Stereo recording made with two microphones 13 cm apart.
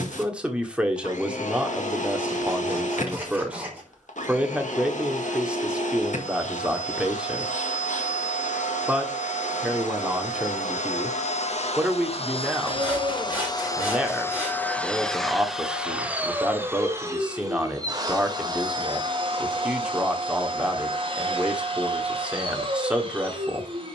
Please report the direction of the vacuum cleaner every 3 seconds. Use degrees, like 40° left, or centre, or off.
70° left, 70° left, 70° left, 60° left, 30° left, 10° right, 40° right, 40° right.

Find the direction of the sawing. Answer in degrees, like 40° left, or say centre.
10° right.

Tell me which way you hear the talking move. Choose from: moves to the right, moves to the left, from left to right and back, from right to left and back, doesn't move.
doesn't move.